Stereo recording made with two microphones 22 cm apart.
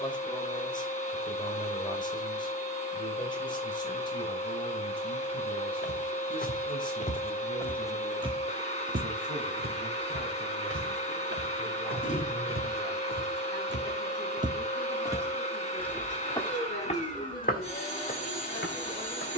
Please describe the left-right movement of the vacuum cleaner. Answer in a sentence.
In this clip you hear the vacuum cleaner stay in one place.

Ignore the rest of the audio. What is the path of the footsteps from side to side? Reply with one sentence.
In this clip you hear the footsteps move from left to right and back again.